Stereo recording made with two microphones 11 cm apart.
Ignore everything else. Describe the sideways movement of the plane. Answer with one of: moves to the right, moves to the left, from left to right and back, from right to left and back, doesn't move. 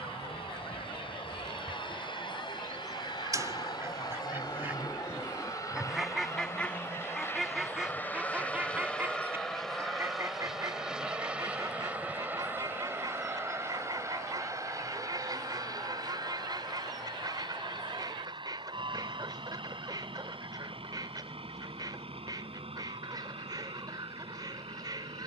moves to the right.